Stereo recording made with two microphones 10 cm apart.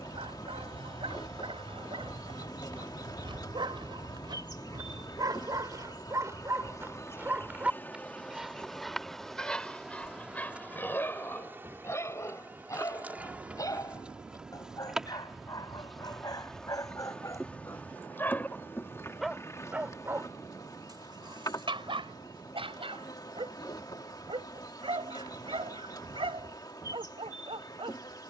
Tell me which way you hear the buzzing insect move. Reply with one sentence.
In this clip you hear the buzzing insect go right and come back.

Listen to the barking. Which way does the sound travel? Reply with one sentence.
In this clip you hear the barking go left and come back.